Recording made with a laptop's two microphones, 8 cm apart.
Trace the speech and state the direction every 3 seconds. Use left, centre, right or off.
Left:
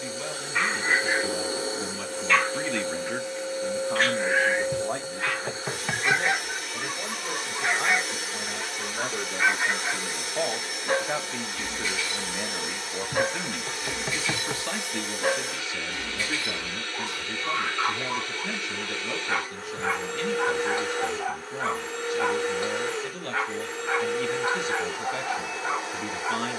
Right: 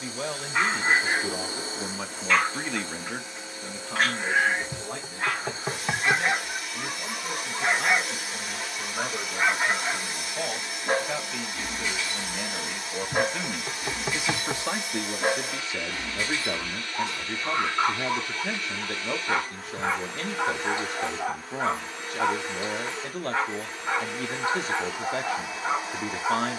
right, left, left, left, centre, right, right, right, right.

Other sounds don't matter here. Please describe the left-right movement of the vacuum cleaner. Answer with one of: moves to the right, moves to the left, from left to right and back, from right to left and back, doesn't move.
doesn't move.